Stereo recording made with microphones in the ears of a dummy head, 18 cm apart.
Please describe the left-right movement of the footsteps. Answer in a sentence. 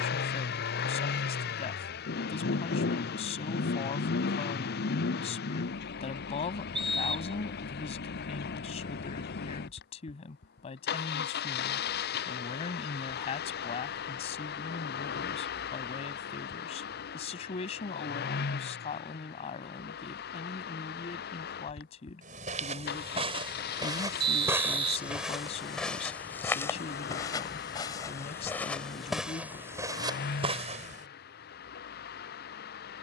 In this clip you hear the footsteps go left and come back.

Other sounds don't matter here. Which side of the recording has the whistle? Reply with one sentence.
You can hear the whistle on the right.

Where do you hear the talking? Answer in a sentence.
In this clip you hear the talking on the left.